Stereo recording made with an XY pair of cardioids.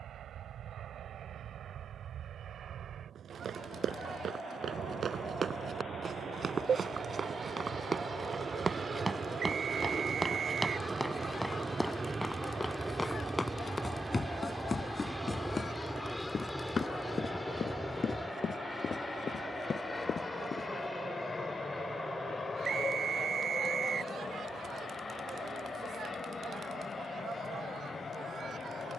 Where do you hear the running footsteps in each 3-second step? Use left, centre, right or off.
off, right, right, centre, left, left, left, off, off, off.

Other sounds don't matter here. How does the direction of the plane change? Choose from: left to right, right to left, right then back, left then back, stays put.
right to left.